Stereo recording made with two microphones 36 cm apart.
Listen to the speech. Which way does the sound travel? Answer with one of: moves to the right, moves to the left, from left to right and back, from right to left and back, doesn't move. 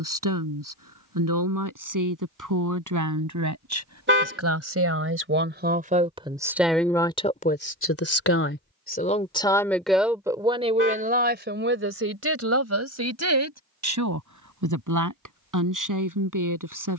from right to left and back.